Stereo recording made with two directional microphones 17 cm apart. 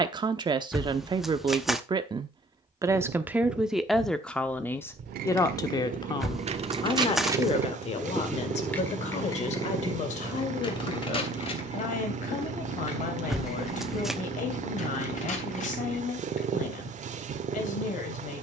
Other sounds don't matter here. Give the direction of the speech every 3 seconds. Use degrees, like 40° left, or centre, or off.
30° right, 10° left, 40° left, 50° left, 50° left, 50° left.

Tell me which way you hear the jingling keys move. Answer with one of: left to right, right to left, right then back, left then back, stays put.
right to left.